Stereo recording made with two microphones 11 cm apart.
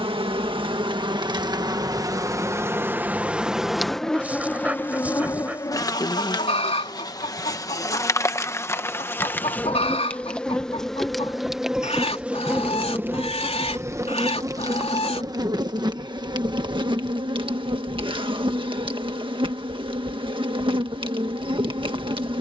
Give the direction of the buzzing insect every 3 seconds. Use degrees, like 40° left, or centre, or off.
40° right, 10° left, 30° left, 10° left, 20° right, 50° right, 50° right, 50° right.